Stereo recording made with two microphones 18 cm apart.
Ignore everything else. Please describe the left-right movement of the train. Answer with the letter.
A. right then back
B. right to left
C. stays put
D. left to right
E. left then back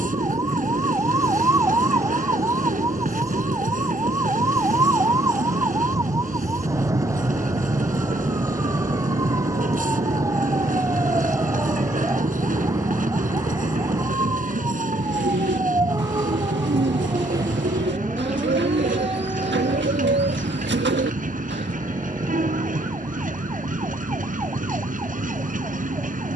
C.